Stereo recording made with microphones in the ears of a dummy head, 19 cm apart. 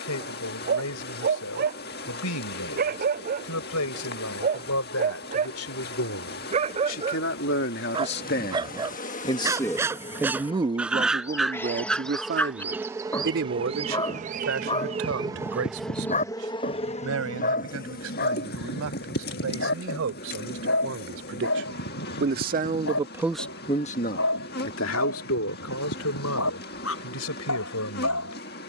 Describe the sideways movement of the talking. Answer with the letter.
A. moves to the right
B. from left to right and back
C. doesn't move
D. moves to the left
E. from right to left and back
B.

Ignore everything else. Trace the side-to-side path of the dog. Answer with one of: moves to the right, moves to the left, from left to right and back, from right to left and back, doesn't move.
moves to the left.